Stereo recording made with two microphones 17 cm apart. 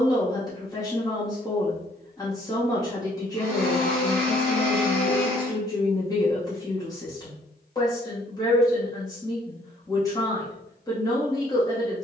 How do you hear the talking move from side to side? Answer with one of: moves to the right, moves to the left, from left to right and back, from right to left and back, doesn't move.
doesn't move.